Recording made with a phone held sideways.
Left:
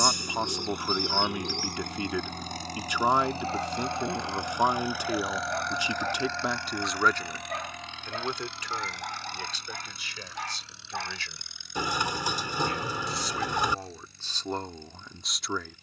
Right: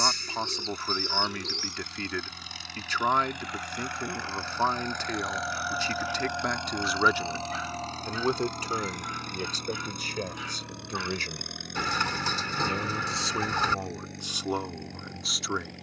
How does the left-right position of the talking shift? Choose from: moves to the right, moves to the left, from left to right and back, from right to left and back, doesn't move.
from left to right and back.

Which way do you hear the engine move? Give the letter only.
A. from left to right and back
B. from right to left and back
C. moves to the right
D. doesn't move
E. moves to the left
C.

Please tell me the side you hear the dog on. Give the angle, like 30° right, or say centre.
60° left.